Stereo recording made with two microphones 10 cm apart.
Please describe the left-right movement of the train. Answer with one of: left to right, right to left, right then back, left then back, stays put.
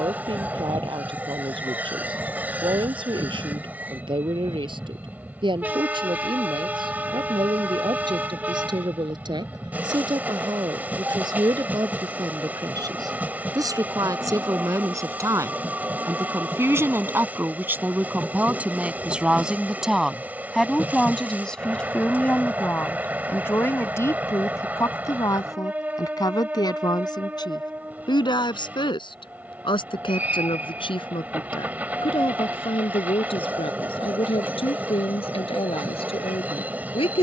stays put.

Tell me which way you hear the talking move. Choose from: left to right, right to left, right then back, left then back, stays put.
right to left.